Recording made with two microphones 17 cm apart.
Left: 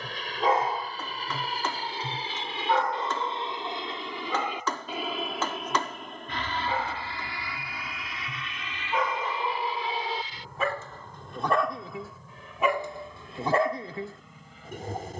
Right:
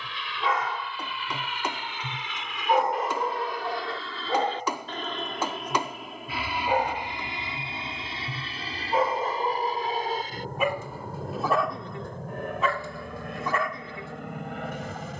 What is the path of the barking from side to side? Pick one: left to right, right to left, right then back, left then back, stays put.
right then back.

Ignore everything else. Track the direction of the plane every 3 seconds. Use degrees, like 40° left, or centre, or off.
40° left, 10° left, 20° right, 50° right, 60° right.